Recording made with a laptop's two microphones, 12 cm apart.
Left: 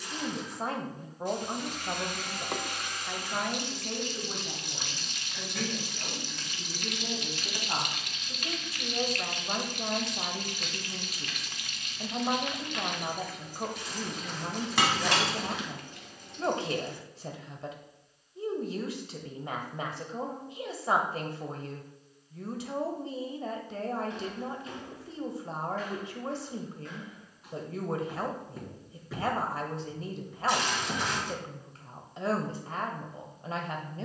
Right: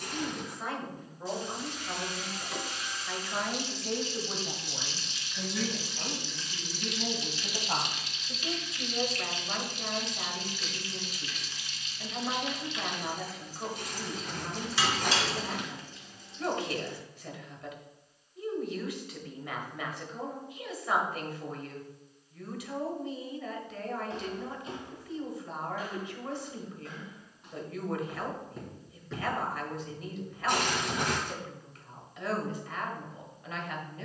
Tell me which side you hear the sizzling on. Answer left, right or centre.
left.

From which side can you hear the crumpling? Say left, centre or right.
right.